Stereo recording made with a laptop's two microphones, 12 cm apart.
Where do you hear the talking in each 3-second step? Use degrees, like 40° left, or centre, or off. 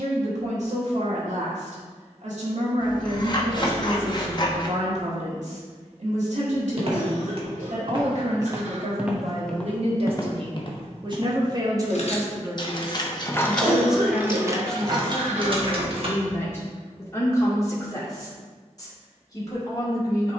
70° right, 70° right, 70° right, 50° right, 10° right, 20° left, 30° left.